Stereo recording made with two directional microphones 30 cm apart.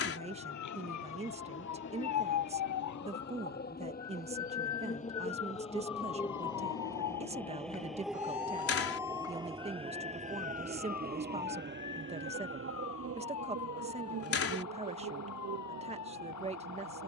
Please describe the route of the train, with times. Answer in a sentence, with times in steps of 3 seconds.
In this clip you hear the train on the left from 0 s, in the centre from 6 s and on the right from 9 s.